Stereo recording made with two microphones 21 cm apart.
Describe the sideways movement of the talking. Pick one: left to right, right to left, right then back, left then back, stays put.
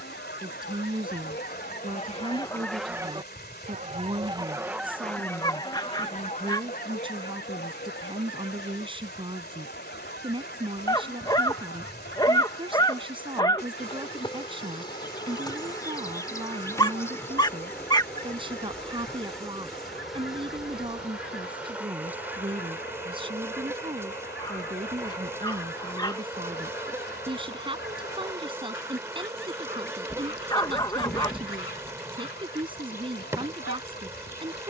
stays put.